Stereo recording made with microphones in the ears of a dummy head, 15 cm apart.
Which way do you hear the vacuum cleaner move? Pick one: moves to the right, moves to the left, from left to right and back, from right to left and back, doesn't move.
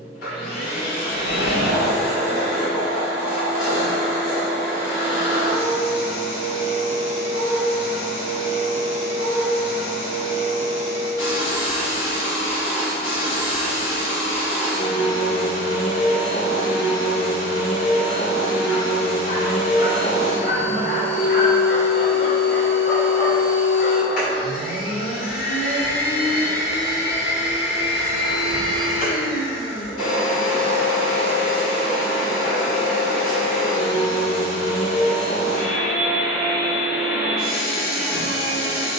doesn't move.